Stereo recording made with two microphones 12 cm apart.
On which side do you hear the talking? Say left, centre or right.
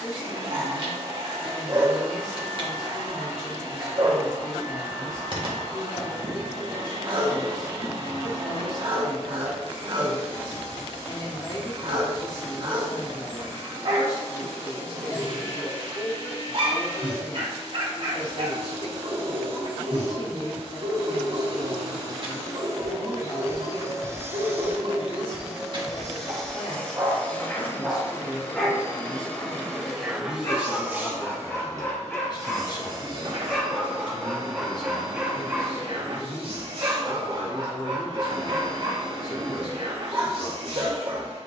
left.